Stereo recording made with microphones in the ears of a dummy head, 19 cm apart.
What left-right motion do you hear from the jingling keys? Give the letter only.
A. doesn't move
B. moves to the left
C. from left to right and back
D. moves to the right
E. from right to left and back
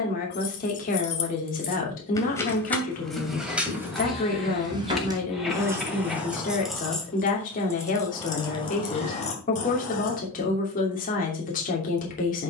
C.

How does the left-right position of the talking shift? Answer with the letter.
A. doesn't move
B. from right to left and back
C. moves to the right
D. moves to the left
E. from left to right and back
A.